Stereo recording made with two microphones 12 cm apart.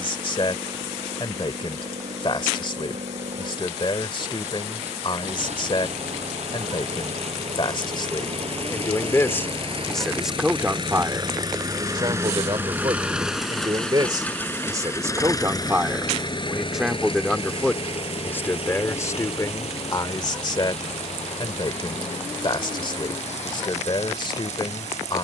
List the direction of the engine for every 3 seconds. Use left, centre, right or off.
right, right, right, right, centre, left, left, left, left.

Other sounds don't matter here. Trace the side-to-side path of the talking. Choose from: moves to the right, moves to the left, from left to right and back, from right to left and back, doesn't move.
from left to right and back.